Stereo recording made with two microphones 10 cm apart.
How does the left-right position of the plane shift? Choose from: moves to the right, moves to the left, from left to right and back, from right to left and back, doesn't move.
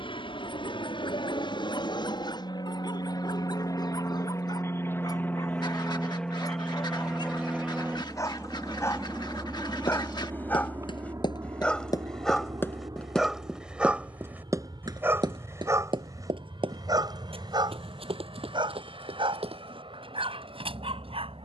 moves to the right.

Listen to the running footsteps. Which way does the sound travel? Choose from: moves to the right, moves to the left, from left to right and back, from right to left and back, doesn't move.
moves to the right.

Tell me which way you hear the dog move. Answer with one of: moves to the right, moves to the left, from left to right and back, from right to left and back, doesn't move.
moves to the right.